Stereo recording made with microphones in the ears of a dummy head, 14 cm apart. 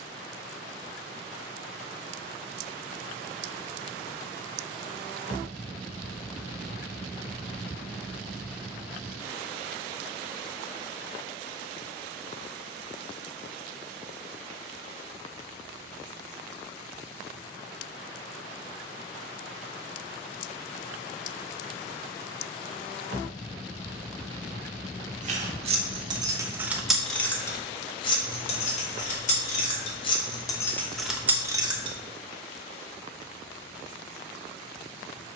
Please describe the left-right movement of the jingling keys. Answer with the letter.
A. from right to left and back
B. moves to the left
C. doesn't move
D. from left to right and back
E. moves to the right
A.